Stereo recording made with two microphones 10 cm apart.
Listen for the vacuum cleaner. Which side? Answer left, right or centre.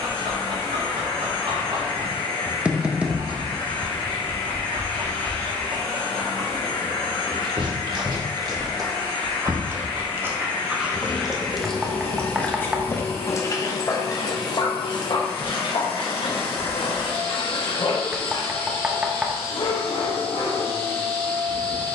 left.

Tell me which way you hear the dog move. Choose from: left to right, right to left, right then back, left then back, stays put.
right to left.